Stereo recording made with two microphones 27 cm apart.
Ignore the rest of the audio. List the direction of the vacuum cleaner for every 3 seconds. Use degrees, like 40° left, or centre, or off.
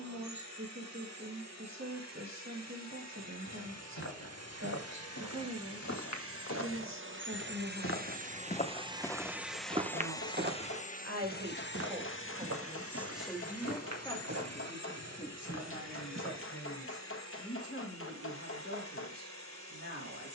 70° right, 60° right, 40° right, 20° left, 60° left, 70° left, 70° left.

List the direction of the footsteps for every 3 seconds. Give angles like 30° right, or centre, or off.
off, 80° left, 50° left, 30° right, 70° right, 70° right, off.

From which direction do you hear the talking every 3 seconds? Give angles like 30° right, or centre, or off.
80° right, 80° right, 80° right, 50° right, 10° left, 40° left, 50° left.